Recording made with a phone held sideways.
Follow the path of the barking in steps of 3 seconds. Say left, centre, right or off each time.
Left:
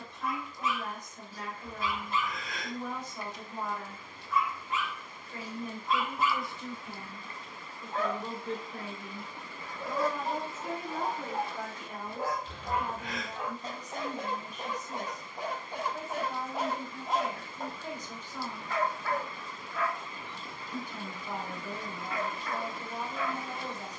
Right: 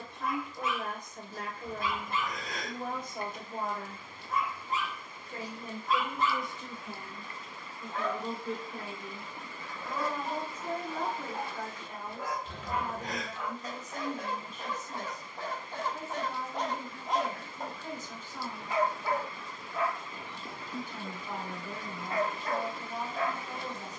right, right, left, left, left, centre, right, right.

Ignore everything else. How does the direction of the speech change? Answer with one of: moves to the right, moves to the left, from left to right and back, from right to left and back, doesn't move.
moves to the left.